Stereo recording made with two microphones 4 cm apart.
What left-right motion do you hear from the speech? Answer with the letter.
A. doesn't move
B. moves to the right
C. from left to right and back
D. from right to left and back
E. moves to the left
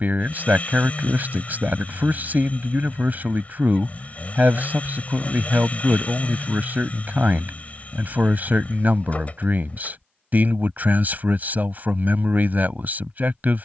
A.